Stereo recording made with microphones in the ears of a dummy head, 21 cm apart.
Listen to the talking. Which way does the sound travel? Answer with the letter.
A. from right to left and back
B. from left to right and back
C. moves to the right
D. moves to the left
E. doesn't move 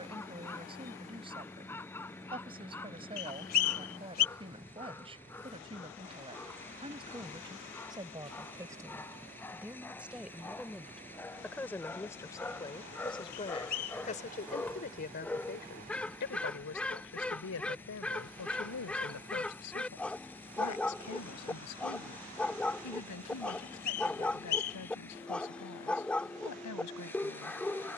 D.